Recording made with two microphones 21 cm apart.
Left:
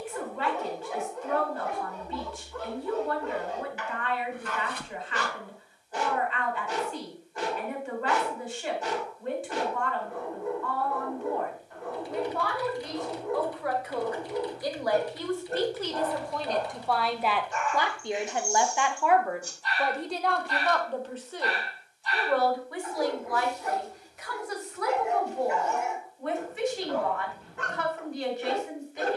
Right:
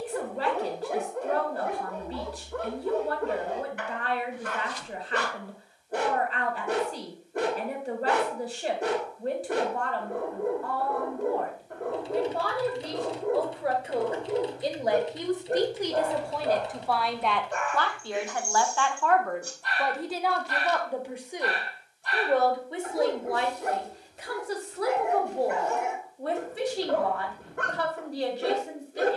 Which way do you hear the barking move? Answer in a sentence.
In this clip you hear the barking stay in one place.